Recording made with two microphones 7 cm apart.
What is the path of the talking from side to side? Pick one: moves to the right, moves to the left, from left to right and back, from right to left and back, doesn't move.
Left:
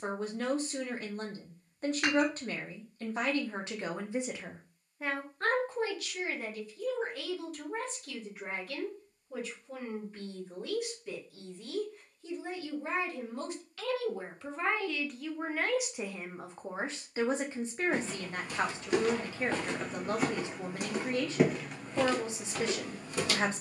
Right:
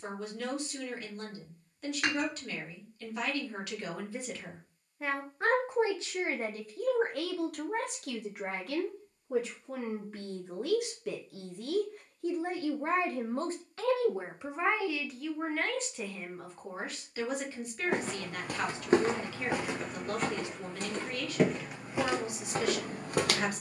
from left to right and back.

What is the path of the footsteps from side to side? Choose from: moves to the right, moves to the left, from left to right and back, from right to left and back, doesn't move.
from right to left and back.